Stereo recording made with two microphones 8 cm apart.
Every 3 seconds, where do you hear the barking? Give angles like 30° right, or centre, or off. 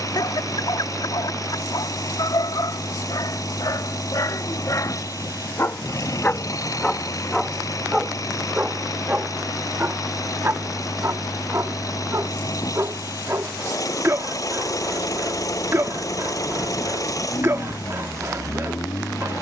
70° left, 50° left, centre, 30° right, 30° right, 30° right, 30° right.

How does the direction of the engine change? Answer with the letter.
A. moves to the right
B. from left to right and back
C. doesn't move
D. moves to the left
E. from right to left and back
C.